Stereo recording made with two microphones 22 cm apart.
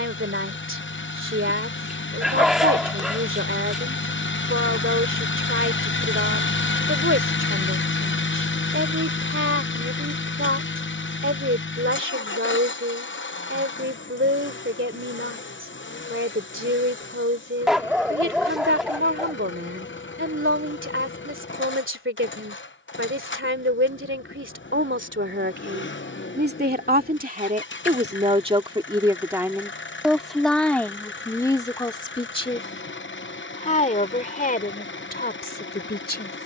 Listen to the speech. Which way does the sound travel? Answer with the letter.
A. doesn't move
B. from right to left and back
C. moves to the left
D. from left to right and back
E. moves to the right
C.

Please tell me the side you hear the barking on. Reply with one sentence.
You can hear the barking in the centre.